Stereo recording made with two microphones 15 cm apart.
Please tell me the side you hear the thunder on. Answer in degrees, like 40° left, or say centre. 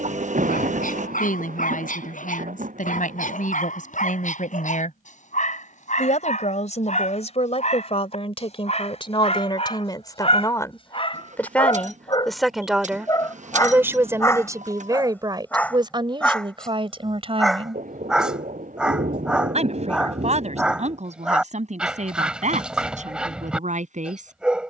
70° right.